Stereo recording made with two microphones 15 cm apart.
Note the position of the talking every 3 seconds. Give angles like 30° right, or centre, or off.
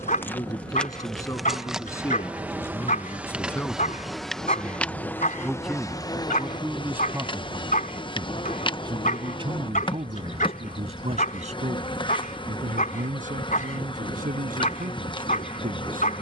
20° left, 10° left, 20° right, 50° right, 70° right, 80° right.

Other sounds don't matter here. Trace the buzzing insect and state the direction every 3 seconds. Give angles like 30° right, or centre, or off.
centre, 10° left, 30° left, 30° left, 30° left, 30° left.